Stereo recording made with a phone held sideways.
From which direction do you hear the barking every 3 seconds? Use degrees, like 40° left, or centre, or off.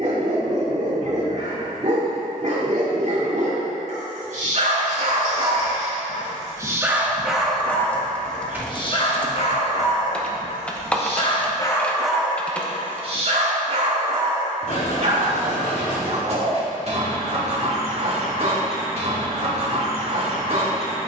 50° right, 50° right, centre, 40° left, 40° right, 50° right, 50° right.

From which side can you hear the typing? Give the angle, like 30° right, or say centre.
10° left.